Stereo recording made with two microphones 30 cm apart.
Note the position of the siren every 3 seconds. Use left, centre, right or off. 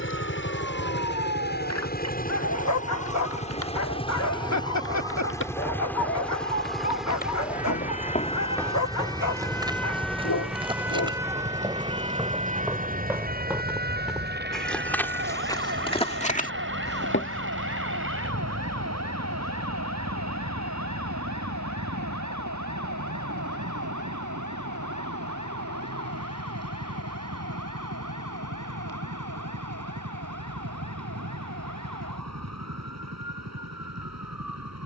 left, left, left, centre, right, right, right, right, right, right, right, right.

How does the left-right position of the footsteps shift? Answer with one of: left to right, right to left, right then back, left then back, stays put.
right then back.